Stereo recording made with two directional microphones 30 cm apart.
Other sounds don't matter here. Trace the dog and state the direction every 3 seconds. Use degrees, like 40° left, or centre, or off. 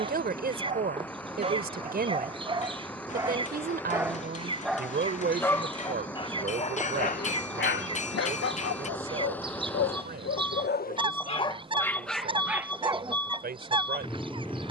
20° right, centre, 30° left, 40° left, 10° right.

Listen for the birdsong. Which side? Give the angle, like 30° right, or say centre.
20° right.